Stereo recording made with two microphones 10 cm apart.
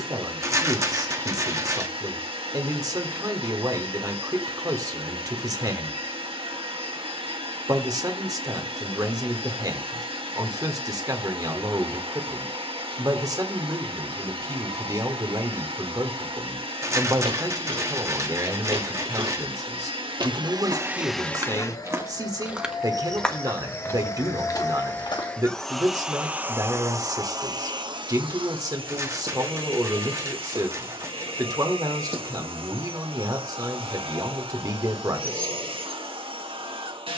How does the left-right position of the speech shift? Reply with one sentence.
In this clip you hear the speech stay in one place.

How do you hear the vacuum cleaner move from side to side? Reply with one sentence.
You can hear the vacuum cleaner move from right to left and back again.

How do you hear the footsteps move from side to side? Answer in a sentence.
You can hear the footsteps travel towards the left.